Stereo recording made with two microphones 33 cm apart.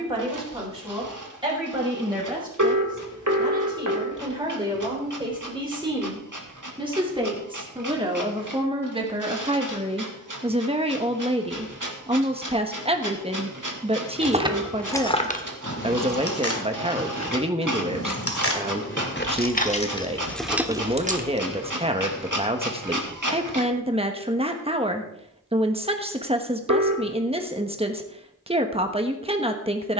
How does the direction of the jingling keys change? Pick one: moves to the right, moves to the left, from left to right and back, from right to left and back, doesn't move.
from right to left and back.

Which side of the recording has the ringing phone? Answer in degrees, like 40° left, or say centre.
60° right.